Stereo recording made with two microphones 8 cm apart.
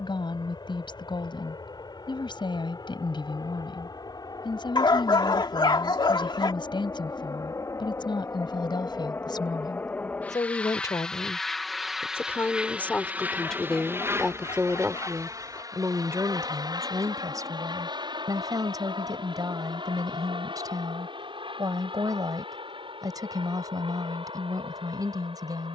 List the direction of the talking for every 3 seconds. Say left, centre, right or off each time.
left, left, left, left, centre, right, right, right, right.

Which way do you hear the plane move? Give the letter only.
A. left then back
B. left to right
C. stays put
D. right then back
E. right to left
B.